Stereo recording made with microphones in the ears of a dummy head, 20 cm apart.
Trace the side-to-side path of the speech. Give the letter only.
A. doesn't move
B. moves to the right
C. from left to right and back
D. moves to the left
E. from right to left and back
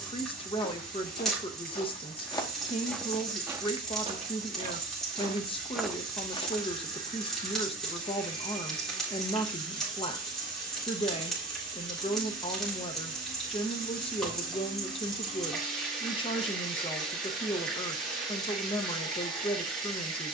A.